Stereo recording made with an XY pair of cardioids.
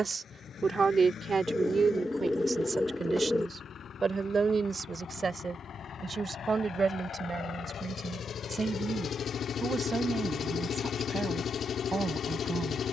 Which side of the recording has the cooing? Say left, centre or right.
centre.